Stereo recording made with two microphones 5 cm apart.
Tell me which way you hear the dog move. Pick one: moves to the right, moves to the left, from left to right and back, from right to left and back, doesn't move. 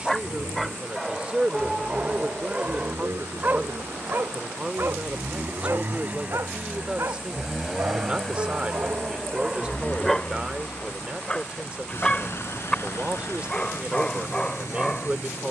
from left to right and back.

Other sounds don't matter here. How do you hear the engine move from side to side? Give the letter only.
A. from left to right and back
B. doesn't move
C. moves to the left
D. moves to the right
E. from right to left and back
C.